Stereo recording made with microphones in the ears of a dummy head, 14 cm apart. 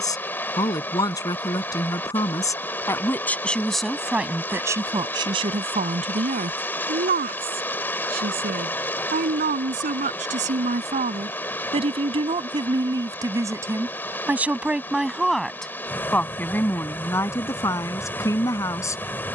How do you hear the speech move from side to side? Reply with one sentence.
You can hear the speech go right and come back.